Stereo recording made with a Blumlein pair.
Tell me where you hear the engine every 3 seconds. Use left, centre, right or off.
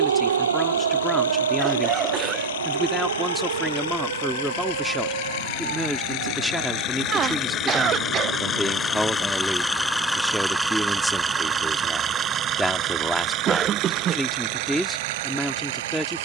left, left, left, centre, right, right.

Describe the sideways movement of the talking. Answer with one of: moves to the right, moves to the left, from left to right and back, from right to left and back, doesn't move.
doesn't move.